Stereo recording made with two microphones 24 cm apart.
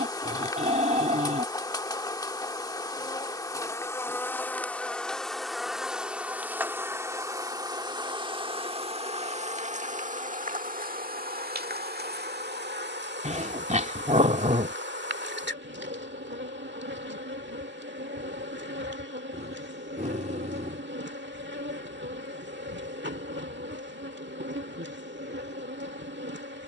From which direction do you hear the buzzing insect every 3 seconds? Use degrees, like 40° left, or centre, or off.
20° left, 10° left, 10° right, 30° right, 50° right, 50° right, 50° right, 50° right, 50° right.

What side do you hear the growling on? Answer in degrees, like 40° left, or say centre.
30° right.